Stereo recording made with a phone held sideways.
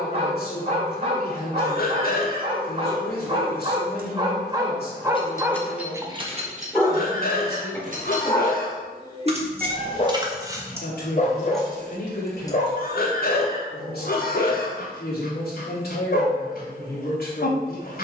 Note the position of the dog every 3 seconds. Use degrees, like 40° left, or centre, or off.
40° right, 20° right, 10° left, 40° left, 60° left, 70° left.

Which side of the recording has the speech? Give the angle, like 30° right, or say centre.
70° left.